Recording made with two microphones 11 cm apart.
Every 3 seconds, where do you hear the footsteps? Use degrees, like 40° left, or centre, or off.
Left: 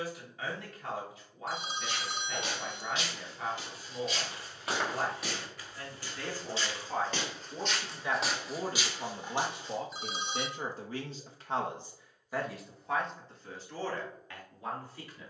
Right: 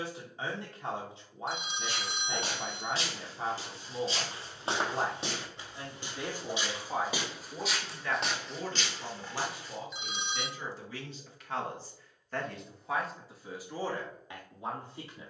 40° right, 30° right, 10° right, 20° left, off.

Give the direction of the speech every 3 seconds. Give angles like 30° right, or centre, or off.
30° right, 30° right, 10° left, 50° left, 10° right.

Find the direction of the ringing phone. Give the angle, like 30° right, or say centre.
40° left.